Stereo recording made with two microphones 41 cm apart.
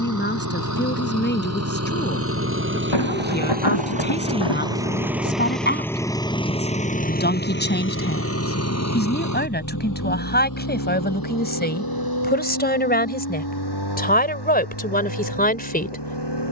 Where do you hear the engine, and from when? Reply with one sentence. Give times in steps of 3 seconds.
You can hear the engine on the right from 0 s, in the centre from 3 s and on the left from 6 s.